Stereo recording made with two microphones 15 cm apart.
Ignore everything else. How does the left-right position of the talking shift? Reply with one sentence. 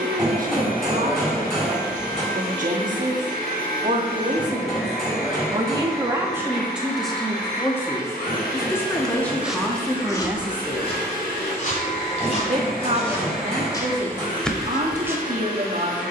You can hear the talking move from right to left and back again.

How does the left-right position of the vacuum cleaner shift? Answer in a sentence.
In this clip you hear the vacuum cleaner stay in one place.